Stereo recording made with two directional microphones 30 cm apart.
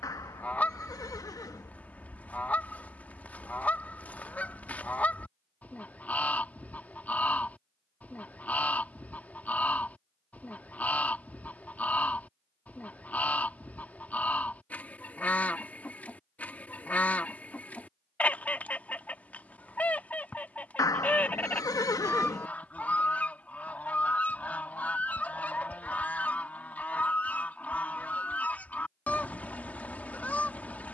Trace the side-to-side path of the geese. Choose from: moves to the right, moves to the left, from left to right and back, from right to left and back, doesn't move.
doesn't move.